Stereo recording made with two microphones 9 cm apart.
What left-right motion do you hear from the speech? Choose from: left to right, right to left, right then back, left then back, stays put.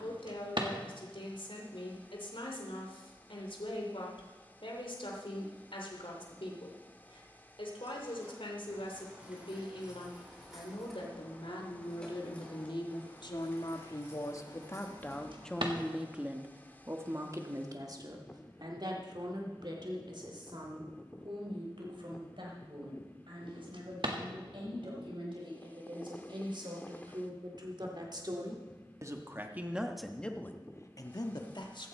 right then back.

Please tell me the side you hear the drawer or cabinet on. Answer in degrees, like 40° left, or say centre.
70° right.